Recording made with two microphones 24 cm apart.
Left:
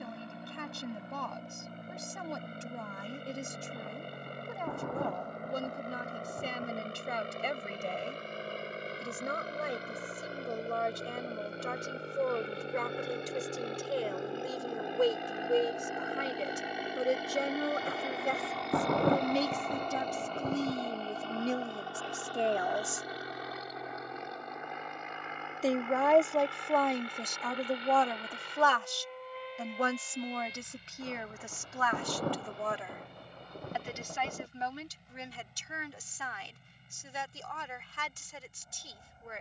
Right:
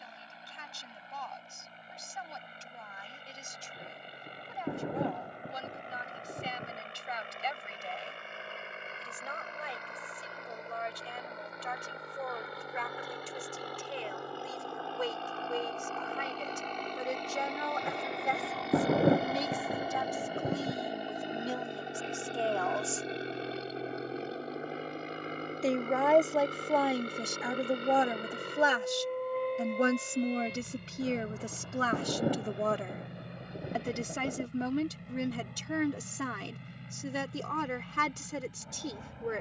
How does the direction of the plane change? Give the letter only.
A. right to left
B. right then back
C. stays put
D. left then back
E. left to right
E.